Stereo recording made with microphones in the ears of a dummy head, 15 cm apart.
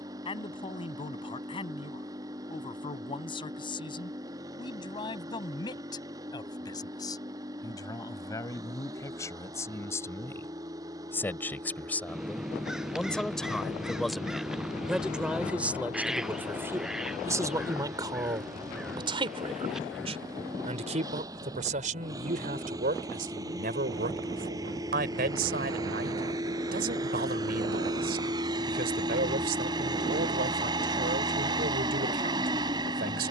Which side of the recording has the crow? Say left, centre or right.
centre.